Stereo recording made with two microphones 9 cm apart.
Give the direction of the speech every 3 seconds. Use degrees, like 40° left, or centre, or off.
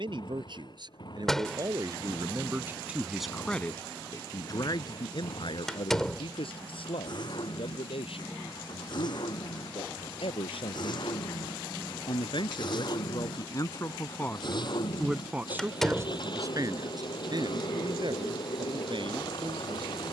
40° right, 40° left, 80° left, 80° left, 40° left, 30° right, 60° right.